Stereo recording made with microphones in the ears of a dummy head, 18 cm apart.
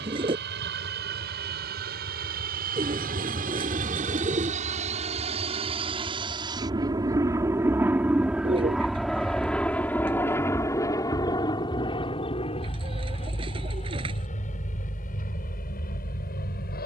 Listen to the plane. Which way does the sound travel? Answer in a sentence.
You can hear the plane go from the right side to the left.